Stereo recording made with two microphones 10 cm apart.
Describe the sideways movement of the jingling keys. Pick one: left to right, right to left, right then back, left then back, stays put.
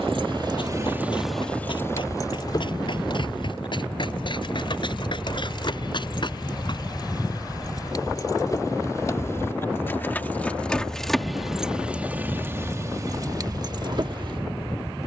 left then back.